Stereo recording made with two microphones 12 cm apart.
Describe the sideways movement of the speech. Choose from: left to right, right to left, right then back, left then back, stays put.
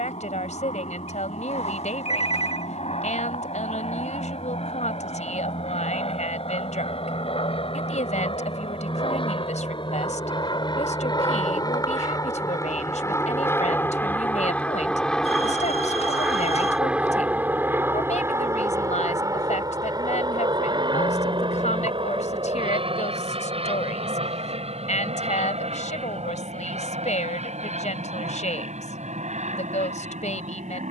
stays put.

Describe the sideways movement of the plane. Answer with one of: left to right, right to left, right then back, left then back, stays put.
left to right.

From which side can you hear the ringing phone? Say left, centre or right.
left.